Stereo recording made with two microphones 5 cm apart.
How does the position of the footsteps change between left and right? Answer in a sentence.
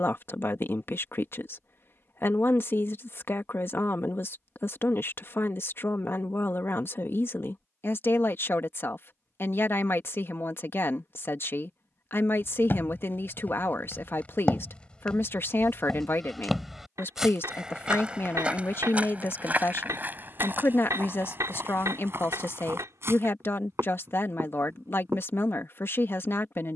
You can hear the footsteps travel towards the right.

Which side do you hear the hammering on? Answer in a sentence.
In this clip you hear the hammering on the right.